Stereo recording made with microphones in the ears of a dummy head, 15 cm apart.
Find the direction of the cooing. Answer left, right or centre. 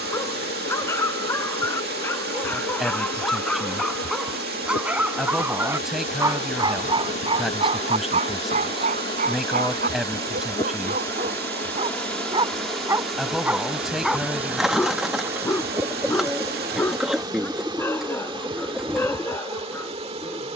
centre.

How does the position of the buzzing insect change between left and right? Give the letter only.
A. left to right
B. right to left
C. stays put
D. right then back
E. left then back
A.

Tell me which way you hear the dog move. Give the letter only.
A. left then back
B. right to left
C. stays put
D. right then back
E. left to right
D.